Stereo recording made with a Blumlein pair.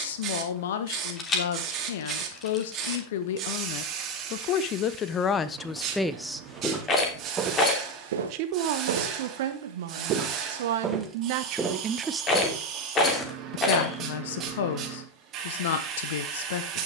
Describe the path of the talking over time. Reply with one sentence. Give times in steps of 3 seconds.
You can hear the talking on the left from 0 s, on the right from 6 s and on the left from 12 s.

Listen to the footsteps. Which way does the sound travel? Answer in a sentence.
In this clip you hear the footsteps go right and come back.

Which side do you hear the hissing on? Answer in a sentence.
You can hear the hissing on the right.